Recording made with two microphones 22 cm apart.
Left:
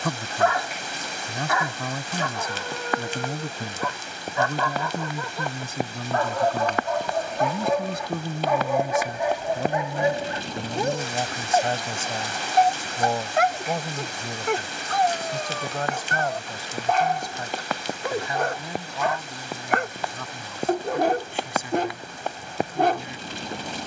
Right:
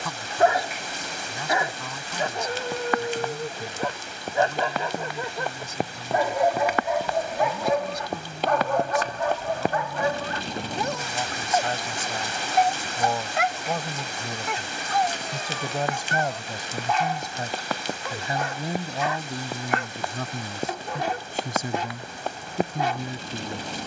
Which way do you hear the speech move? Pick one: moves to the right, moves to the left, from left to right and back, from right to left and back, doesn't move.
moves to the right.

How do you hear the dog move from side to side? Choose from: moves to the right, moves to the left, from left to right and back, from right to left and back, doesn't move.
moves to the left.